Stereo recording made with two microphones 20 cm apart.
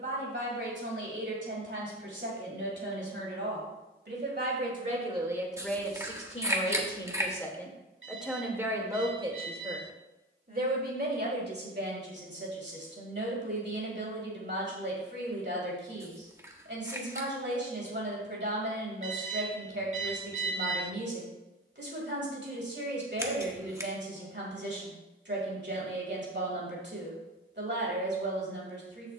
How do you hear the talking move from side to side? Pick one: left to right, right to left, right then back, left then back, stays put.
left then back.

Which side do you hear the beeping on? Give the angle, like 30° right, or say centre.
60° right.